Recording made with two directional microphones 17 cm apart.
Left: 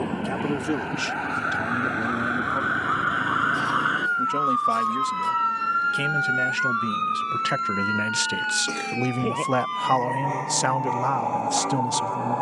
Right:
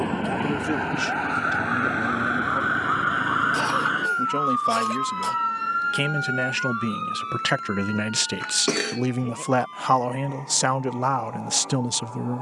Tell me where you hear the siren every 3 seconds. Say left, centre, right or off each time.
right, centre, left, left.